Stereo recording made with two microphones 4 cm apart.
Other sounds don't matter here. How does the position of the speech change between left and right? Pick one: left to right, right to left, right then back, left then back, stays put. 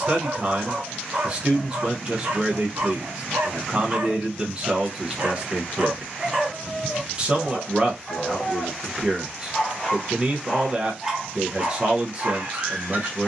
stays put.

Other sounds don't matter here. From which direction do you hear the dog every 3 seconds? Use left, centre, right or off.
right, right, centre, centre, right.